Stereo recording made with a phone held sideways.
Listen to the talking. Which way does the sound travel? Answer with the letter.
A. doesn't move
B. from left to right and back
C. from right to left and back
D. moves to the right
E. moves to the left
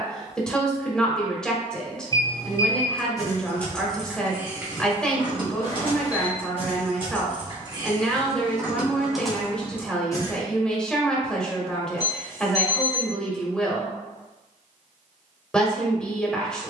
A.